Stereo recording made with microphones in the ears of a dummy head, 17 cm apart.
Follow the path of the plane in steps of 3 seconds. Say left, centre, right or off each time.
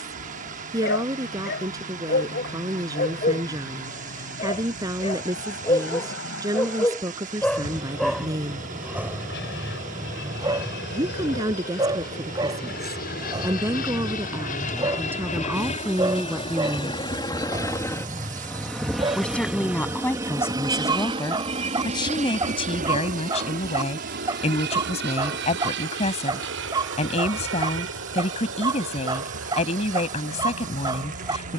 left, left, left, left, left, left, centre, right, right, right, right.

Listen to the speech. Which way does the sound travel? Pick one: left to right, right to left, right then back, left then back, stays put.
right to left.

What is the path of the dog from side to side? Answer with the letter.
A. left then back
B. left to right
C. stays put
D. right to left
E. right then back
B.